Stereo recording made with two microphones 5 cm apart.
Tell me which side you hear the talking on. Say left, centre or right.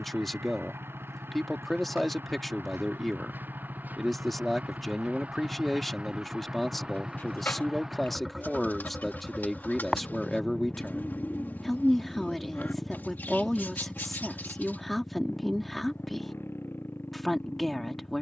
centre.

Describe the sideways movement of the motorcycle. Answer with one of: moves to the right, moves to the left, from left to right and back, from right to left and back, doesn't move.
moves to the left.